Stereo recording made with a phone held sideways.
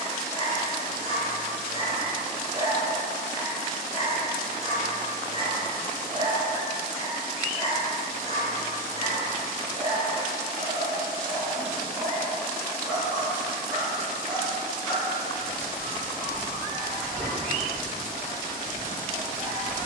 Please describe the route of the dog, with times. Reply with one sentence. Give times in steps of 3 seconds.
You can hear the dog on the right from 0 s, in the centre from 12 s and on the right from 18 s.